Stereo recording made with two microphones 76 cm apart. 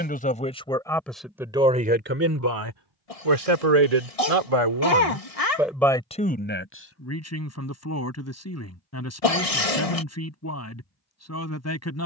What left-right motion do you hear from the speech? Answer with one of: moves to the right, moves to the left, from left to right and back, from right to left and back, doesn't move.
from left to right and back.